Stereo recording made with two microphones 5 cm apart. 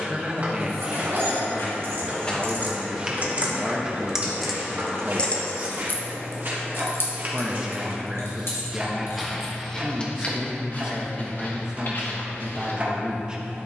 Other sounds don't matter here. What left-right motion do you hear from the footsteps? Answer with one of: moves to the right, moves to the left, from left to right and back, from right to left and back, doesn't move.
from left to right and back.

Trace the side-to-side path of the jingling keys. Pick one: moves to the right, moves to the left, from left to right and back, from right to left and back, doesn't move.
moves to the left.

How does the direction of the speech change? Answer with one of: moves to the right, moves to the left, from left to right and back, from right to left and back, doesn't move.
doesn't move.